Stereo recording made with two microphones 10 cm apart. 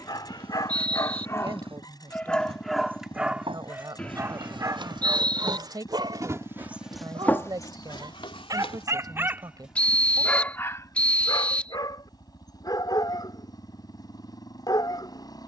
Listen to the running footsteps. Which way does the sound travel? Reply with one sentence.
In this clip you hear the running footsteps go from the right side to the left.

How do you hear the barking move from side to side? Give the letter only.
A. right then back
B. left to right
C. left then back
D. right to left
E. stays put
A.